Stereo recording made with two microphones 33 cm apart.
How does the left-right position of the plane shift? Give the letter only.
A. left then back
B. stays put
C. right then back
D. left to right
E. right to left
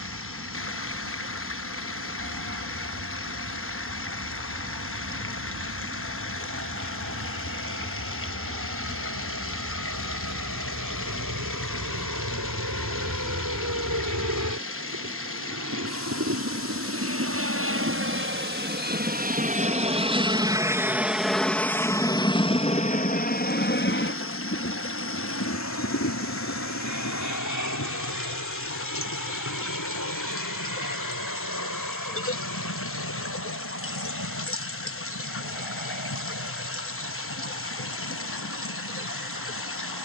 E.